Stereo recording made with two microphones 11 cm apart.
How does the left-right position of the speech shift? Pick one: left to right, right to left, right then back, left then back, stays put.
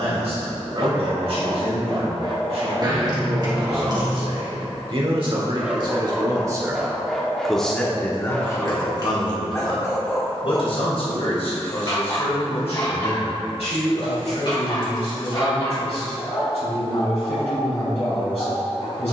right to left.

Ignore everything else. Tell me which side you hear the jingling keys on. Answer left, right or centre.
right.